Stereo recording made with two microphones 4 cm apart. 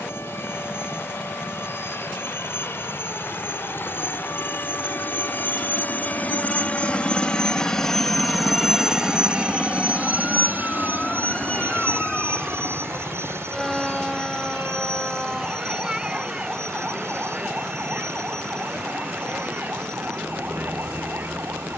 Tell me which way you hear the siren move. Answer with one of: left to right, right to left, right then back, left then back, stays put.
left to right.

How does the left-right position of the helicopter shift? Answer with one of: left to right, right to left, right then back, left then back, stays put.
left to right.